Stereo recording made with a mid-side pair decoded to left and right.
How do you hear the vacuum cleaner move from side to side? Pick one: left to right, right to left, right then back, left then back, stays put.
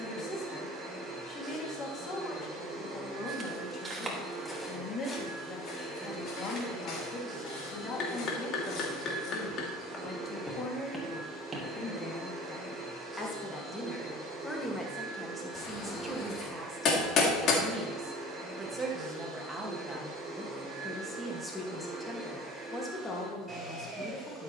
stays put.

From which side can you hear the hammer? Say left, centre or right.
left.